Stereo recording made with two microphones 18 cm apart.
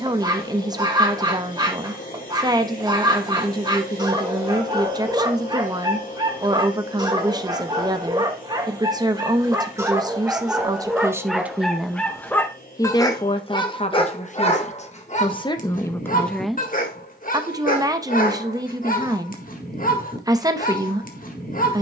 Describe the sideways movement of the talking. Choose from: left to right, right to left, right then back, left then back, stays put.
left then back.